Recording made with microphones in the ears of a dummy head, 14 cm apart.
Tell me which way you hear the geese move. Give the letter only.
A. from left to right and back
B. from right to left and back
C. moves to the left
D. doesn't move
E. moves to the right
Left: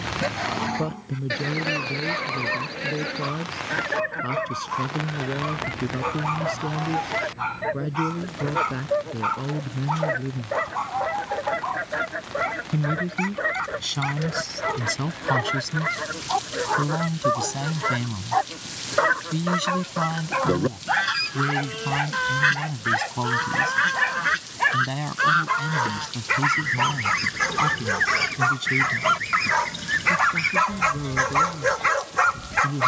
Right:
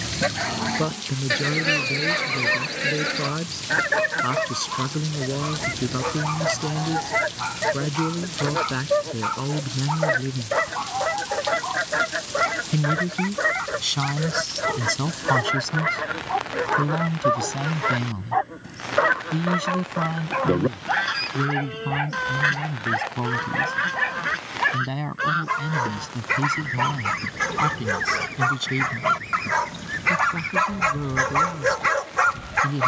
C.